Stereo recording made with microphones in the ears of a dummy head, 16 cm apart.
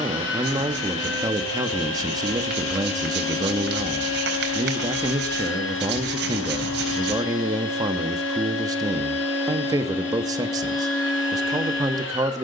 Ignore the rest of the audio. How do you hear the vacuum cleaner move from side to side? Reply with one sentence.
In this clip you hear the vacuum cleaner stay in one place.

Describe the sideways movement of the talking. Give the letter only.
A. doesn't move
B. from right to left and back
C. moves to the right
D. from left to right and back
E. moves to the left
A.